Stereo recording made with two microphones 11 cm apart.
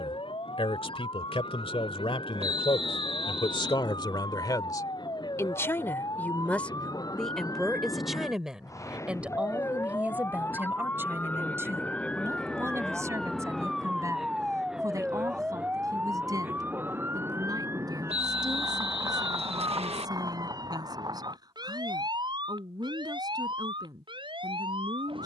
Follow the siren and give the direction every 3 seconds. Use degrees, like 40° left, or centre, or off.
50° left, 50° left, 30° left, 20° left, centre, 20° right, 30° right, 40° right, 50° right.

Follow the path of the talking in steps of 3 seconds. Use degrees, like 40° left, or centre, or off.
60° left, 40° left, centre, 20° right, 30° right, 40° right, 40° right, 40° right, 40° right.